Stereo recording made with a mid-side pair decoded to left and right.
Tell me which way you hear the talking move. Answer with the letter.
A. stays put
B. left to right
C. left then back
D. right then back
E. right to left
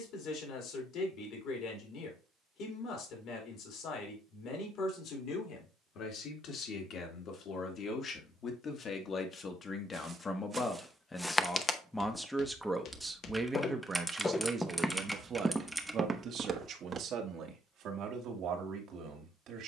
B.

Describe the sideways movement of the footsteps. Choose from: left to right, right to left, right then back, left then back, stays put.
left then back.